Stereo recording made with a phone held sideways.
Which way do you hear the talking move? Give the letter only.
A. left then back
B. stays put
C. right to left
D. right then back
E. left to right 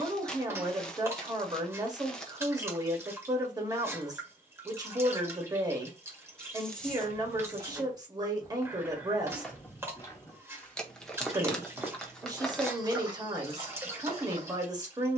B.